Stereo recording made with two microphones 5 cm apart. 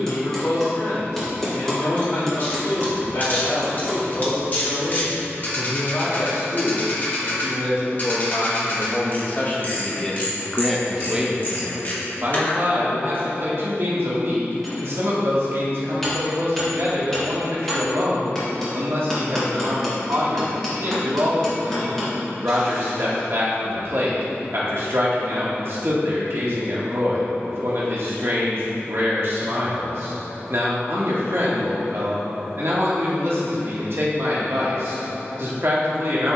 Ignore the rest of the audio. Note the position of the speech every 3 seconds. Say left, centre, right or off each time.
left, left, left, centre, right, right, right, right, right, right, right, right.